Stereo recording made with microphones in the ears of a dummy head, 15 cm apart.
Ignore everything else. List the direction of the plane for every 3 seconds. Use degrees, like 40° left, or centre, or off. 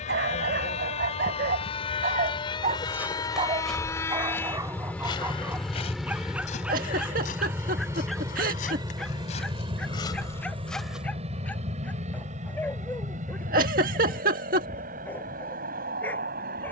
40° left, 10° left, 10° right, 30° right, 50° right, 50° right.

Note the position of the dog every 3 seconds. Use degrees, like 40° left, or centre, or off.
60° right, 20° right, centre, 10° left, 10° left, 10° left.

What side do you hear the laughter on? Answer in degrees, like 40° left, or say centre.
50° right.